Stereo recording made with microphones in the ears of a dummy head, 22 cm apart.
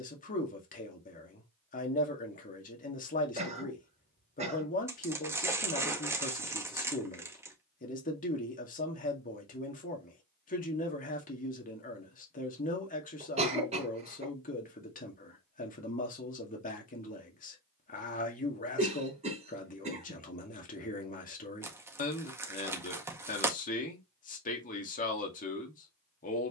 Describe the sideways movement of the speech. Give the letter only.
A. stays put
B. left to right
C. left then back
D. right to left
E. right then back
A.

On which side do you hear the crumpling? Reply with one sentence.
You can hear the crumpling in the centre.